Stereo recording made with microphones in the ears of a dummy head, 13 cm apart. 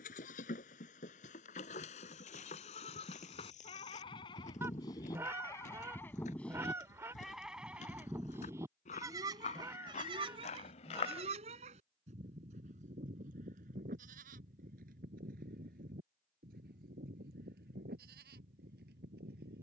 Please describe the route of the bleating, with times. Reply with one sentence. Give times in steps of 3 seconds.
You can hear the bleating on the left from 0 s, in the centre from 6 s and on the right from 9 s.